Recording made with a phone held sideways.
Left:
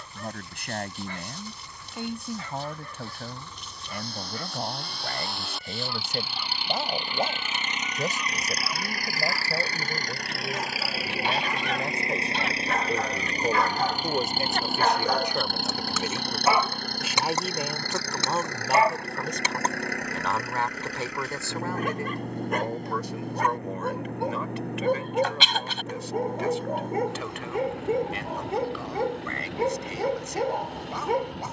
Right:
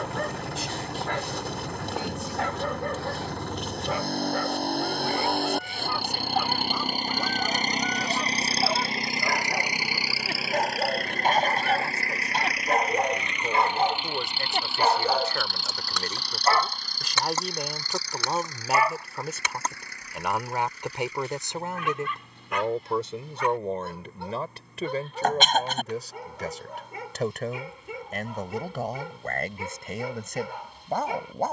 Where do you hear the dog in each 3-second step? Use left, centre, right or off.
right, right, right, right, right, centre, left, left, left, left, left.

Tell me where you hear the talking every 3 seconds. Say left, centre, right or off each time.
left, left, left, left, left, centre, centre, right, right, right, right.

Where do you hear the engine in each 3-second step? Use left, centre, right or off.
right, right, right, centre, left, left, left, left, left, left, left.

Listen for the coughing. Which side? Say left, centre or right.
right.